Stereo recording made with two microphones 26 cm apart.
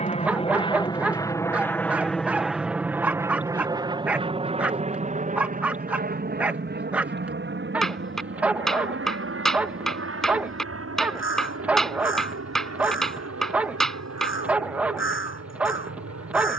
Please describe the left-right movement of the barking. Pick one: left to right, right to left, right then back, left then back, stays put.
stays put.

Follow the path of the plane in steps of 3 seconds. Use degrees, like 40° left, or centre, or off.
10° left, 20° right, 40° right, 50° right, 60° right, 60° right.